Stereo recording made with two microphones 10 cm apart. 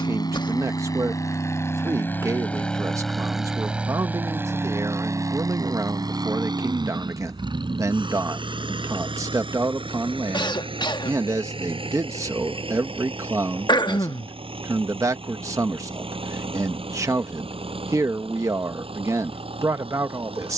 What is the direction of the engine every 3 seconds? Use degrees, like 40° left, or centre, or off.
30° left, 20° right, 60° right, 70° right, 70° right, 80° right, 80° right.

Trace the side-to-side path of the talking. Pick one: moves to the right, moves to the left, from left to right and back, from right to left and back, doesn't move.
doesn't move.